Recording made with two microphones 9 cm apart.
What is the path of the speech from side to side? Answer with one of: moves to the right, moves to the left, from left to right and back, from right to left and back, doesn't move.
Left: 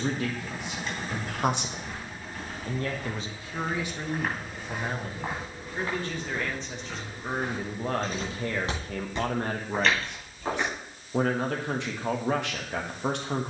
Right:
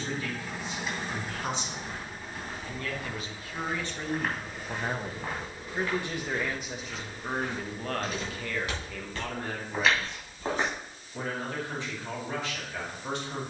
from left to right and back.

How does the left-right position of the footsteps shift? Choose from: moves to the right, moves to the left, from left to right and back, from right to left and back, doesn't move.
from right to left and back.